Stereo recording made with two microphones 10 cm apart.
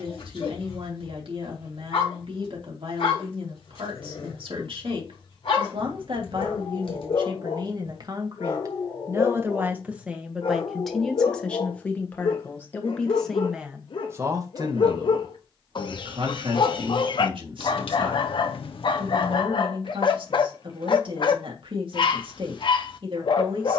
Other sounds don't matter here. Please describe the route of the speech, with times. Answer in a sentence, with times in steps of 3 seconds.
In this clip you hear the speech on the right from 0 s, in the centre from 9 s and on the right from 15 s.